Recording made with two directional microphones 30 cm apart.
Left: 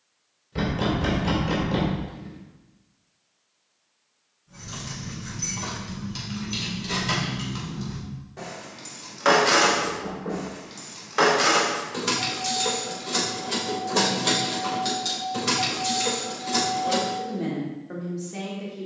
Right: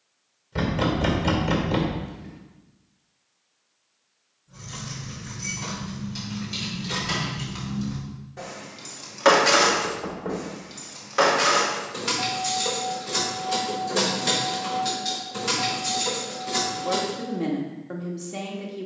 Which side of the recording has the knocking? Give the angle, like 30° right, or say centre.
20° right.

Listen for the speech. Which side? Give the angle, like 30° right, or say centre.
20° right.